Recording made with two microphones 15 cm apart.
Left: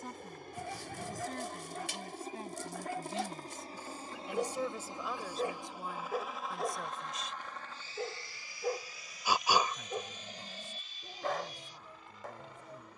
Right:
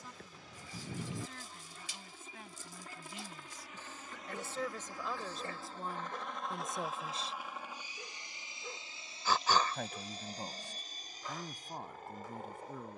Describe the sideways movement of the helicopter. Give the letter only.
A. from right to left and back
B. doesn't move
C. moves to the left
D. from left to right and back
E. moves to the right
E.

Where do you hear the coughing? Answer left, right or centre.
centre.